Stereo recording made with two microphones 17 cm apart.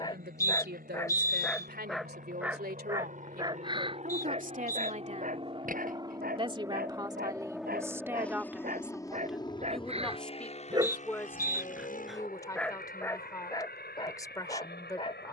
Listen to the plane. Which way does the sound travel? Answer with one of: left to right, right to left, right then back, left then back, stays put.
right to left.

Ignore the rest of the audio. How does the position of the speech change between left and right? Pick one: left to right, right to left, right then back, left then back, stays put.
right to left.